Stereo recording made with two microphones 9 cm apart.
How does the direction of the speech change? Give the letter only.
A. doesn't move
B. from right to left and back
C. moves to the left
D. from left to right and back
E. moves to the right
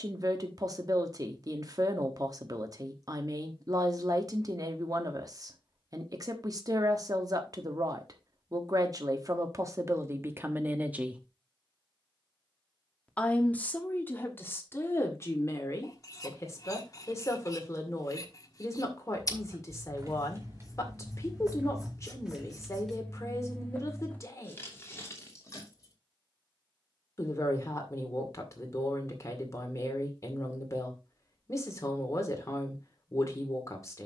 C.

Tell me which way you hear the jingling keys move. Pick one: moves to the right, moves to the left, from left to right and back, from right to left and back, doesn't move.
moves to the left.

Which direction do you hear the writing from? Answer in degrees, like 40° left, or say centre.
40° left.